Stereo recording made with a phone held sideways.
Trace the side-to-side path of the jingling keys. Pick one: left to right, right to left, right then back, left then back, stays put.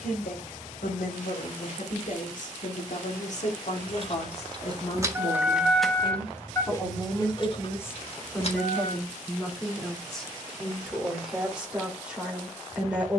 right to left.